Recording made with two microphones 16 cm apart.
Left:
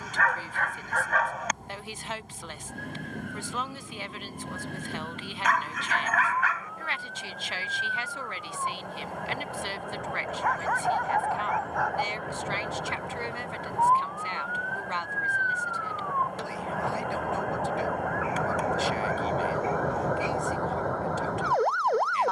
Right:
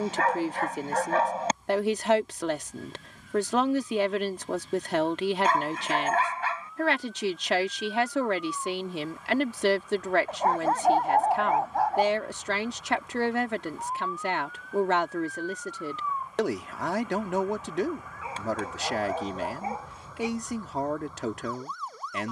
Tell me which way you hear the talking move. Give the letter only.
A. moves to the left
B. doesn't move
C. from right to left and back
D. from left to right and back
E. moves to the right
B.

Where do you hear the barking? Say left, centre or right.
right.